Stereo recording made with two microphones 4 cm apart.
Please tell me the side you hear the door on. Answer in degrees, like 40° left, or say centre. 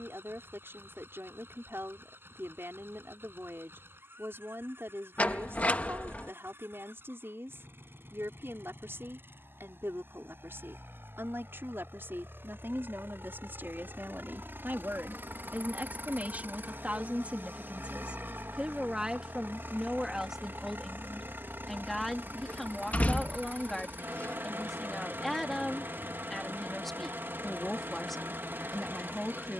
40° left.